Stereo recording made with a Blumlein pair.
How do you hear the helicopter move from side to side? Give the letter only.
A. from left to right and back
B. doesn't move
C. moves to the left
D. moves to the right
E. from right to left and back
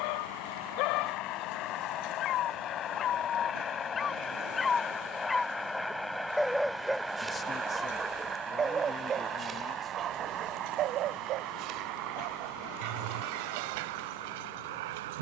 D.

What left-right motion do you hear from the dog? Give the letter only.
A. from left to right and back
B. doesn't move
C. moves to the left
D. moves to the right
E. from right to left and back
D.